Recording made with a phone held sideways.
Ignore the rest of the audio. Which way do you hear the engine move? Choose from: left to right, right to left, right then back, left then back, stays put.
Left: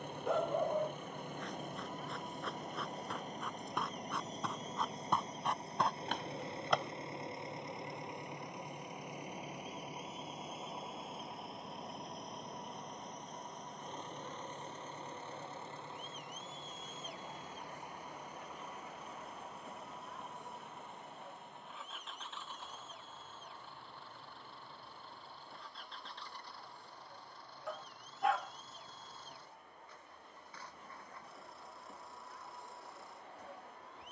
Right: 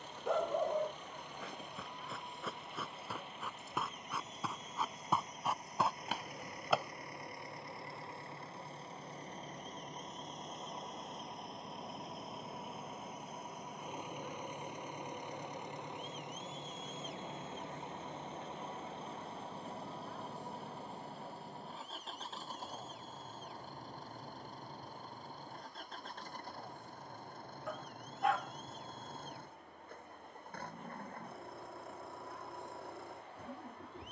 left to right.